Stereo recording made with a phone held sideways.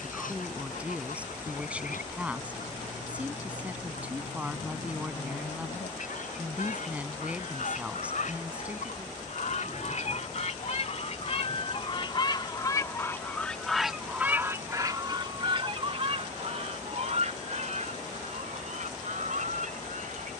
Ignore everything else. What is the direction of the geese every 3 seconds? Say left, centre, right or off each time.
left, left, left, left, centre, right, right.